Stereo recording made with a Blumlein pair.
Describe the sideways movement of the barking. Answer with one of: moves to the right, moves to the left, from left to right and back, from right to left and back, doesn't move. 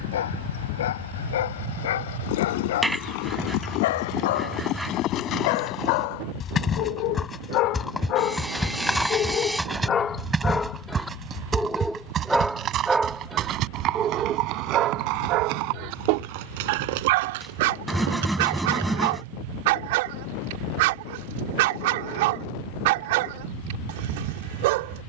moves to the right.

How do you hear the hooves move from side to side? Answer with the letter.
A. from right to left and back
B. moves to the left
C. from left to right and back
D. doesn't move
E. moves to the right
E.